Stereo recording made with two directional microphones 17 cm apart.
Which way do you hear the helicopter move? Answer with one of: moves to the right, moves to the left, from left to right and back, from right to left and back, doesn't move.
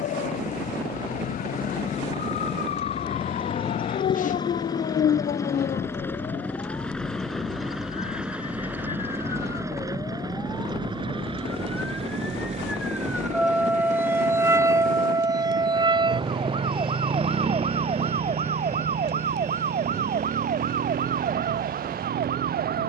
moves to the right.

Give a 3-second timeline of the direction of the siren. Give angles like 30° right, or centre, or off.
60° left, 50° left, 30° left, 20° left, 10° right, 30° right, 40° right, 50° right.